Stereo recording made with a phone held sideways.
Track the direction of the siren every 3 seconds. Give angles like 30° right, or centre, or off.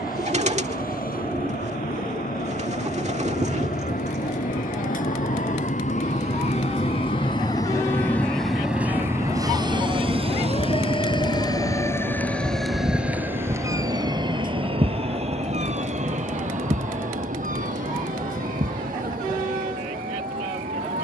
80° left, 80° left, 70° left, 40° left, 20° right, 50° right, 70° right.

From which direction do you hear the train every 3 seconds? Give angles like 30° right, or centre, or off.
80° left, 70° left, 20° left, 40° right, 60° right, 70° right, 80° right.